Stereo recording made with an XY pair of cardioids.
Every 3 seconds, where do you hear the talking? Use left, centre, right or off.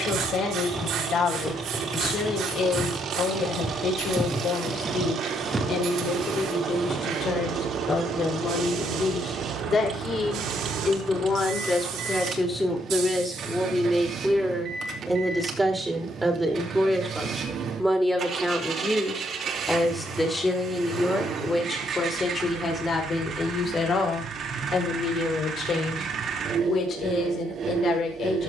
left, left, left, left, centre, centre, centre, left, left, left.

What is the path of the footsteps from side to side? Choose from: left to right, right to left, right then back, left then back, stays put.
left to right.